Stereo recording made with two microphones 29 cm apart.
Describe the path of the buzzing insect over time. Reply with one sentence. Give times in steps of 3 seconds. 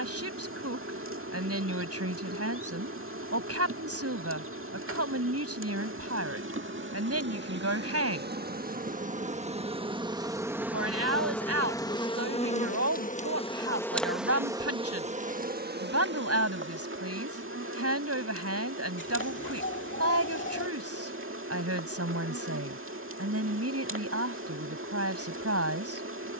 In this clip you hear the buzzing insect on the right from 0 s, in the centre from 9 s and on the right from 15 s.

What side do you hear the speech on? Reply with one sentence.
You can hear the speech on the right.